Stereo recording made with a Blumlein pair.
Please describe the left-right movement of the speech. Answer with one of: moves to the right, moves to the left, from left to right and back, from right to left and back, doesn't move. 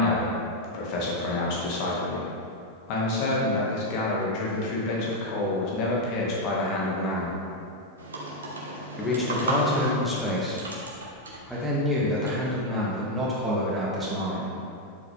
moves to the right.